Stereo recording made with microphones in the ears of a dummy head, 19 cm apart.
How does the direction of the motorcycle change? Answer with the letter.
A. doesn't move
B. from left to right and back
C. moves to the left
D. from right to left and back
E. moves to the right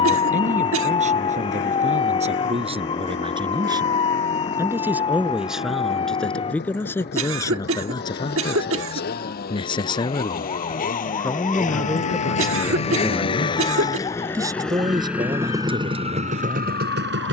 E.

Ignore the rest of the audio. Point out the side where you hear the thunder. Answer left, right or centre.
left.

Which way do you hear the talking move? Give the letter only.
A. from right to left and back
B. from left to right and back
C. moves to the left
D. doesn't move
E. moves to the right
A.